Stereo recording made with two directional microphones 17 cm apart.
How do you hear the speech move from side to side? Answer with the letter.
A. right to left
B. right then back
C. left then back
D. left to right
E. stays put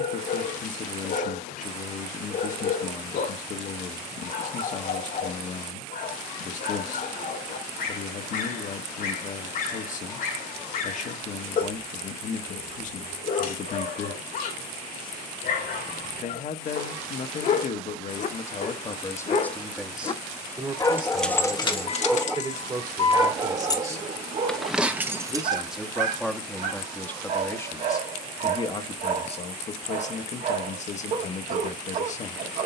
B.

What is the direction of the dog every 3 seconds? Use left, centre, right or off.
left, left, left, left, left, left, left, centre, right, right, right.